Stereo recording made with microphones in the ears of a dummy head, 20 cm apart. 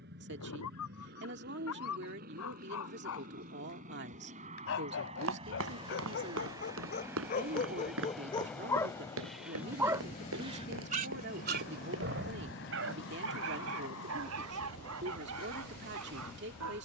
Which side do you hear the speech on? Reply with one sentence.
In this clip you hear the speech on the right.